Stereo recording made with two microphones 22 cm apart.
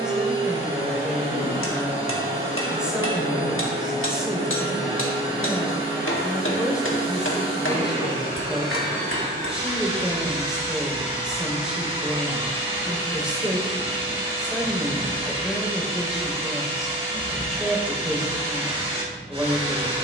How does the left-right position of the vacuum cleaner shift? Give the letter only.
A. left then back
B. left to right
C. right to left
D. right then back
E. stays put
E.